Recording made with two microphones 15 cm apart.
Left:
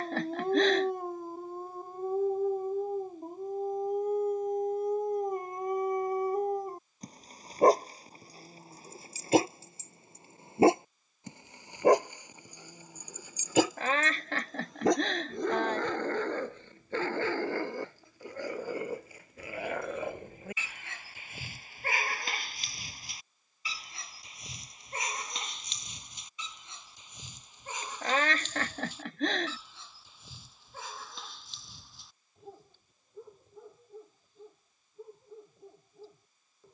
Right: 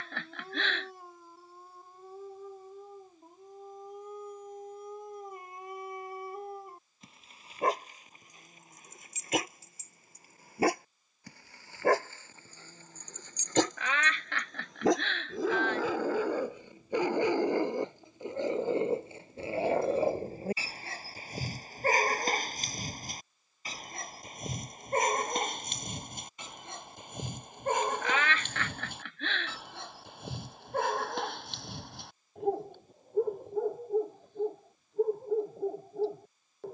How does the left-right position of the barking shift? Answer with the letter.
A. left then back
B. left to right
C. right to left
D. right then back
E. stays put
B.